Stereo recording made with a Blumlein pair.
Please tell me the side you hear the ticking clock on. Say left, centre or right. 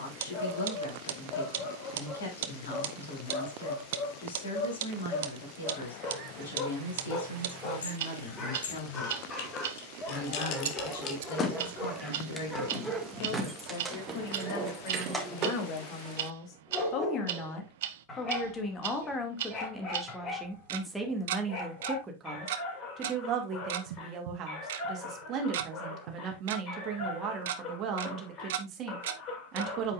right.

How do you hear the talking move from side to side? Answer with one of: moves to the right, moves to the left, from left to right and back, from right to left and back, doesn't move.
moves to the right.